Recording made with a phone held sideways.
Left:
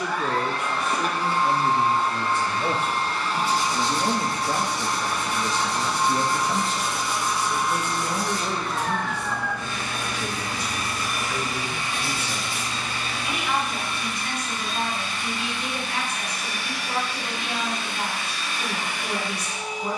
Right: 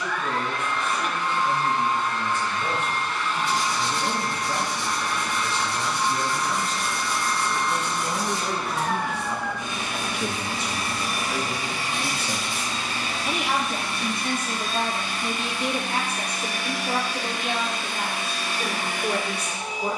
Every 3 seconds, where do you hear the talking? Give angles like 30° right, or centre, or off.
60° left, 50° left, 10° left, 20° right, 40° right, 50° right, 60° right.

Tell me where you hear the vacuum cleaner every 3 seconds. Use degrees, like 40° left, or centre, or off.
30° left, 30° left, 10° left, 20° right, 40° right, 50° right, 50° right.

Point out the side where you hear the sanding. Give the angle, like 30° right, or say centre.
20° right.